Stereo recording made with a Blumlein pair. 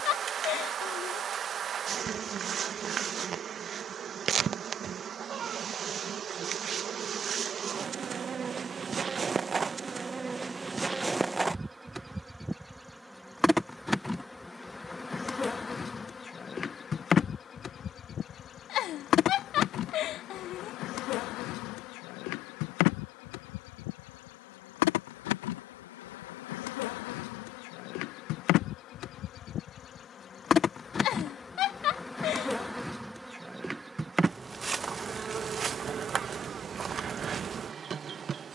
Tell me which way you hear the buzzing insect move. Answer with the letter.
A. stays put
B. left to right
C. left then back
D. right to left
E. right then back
C.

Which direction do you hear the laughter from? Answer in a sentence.
You can hear the laughter on the left.